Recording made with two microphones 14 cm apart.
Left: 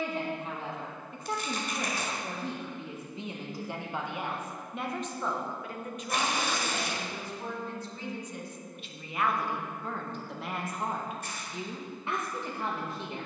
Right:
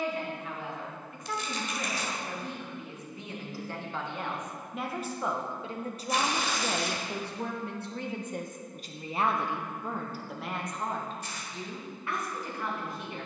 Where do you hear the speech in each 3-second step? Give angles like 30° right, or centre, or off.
30° left, centre, 50° right, centre, 30° left.